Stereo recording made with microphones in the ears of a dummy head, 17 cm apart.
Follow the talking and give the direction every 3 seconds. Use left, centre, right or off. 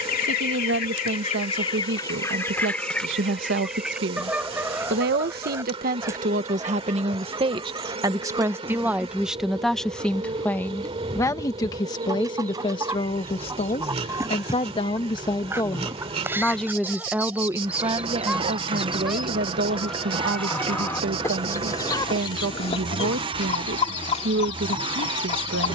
right, right, right, centre, left, centre, right, right, right.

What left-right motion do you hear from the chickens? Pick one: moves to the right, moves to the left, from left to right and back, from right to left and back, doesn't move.
from left to right and back.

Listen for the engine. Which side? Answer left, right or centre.
right.